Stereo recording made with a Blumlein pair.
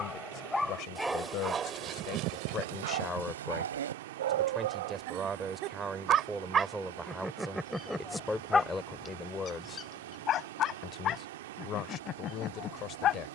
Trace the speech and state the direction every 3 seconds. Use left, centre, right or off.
left, centre, centre, left, left.